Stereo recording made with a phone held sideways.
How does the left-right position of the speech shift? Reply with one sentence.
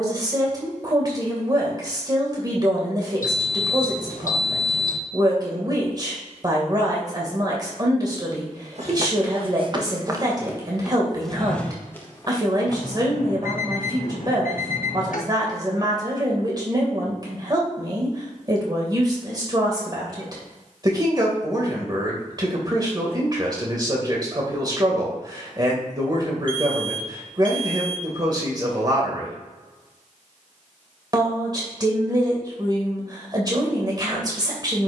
You can hear the speech stay put.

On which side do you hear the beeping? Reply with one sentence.
You can hear the beeping on the left.